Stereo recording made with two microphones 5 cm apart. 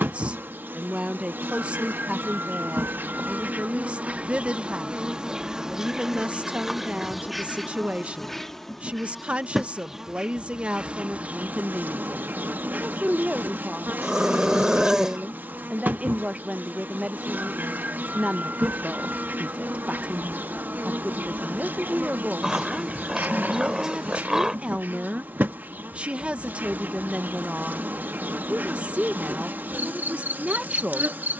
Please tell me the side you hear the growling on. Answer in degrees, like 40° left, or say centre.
10° right.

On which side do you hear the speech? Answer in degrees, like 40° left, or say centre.
30° right.